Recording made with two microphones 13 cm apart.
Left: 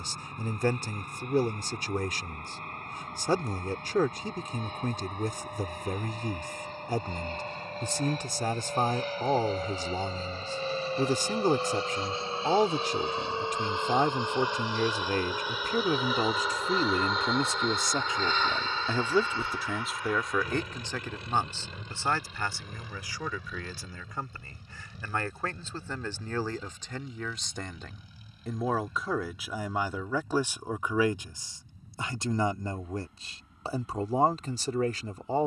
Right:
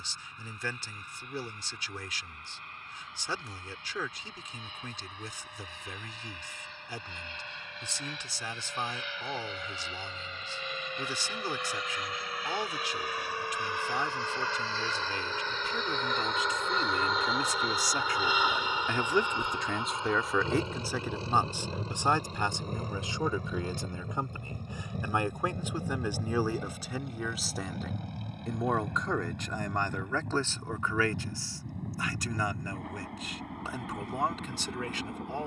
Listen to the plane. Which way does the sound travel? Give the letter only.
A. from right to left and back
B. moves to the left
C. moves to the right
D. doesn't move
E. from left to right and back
C.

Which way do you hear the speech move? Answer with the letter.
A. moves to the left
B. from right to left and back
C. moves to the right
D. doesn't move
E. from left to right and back
E.